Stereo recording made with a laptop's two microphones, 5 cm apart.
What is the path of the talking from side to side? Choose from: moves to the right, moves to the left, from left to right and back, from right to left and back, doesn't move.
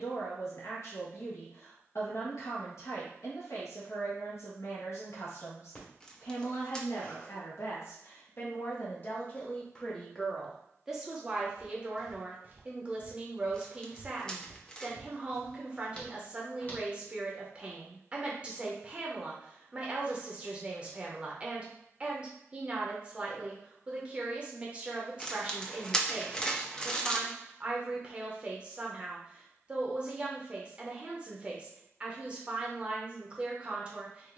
moves to the right.